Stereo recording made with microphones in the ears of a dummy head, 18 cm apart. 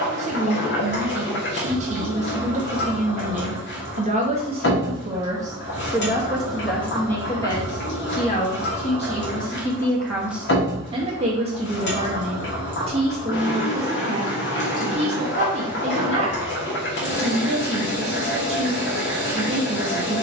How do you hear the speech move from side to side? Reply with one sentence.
You can hear the speech move from right to left and back again.